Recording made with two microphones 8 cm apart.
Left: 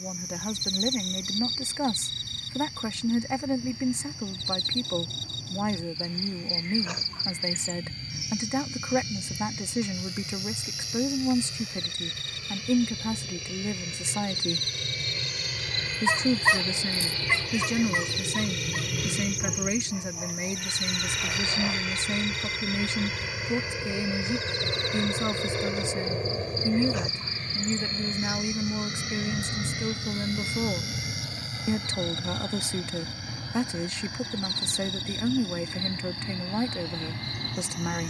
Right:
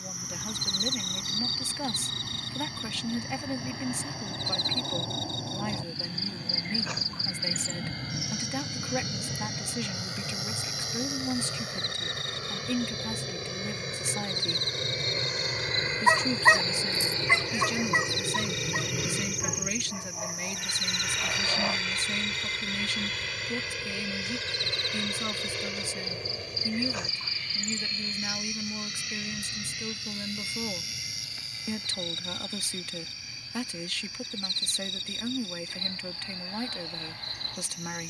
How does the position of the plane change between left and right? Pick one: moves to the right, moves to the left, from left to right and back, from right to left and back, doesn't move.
moves to the left.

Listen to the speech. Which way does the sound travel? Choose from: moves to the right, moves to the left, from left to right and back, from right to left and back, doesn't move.
doesn't move.